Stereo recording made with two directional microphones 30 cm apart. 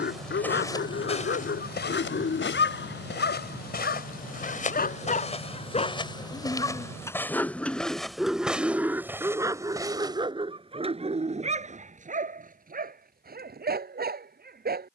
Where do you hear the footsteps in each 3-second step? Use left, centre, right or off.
left, left, centre, centre, off.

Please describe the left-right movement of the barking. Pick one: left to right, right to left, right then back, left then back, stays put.
left to right.